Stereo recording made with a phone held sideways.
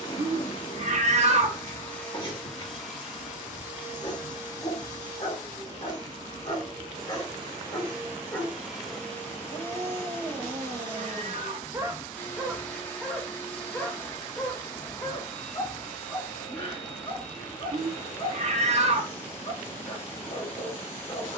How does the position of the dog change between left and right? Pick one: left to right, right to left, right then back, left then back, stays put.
right then back.